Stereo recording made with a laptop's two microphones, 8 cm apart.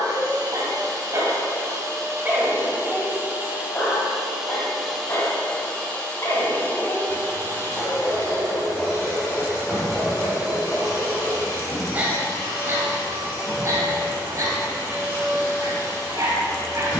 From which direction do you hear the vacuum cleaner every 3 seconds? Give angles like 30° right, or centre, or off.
50° right, centre, 30° left, 50° left, 60° left, 60° left.